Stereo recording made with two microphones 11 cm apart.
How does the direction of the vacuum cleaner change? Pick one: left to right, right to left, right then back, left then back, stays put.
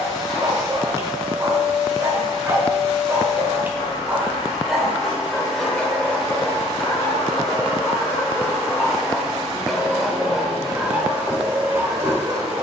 stays put.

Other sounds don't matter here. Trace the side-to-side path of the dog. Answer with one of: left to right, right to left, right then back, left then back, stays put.
left then back.